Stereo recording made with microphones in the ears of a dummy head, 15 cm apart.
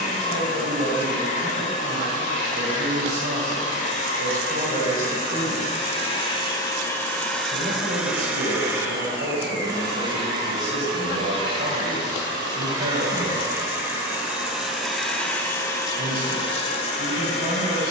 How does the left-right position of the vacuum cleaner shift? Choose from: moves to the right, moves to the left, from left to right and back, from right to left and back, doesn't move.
from left to right and back.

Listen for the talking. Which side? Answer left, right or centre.
right.